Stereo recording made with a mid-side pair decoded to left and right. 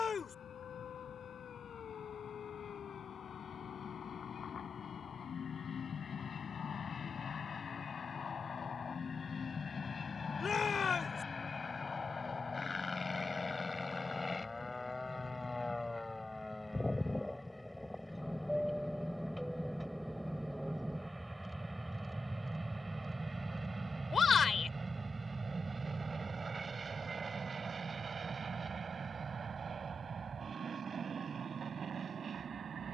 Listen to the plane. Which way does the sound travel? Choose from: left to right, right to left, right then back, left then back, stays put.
left to right.